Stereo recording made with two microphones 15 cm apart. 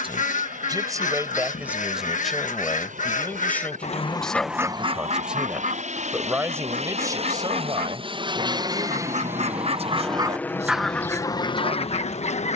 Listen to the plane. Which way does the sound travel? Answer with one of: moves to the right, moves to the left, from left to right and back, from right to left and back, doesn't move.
moves to the left.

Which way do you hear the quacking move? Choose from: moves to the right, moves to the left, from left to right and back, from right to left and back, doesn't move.
from left to right and back.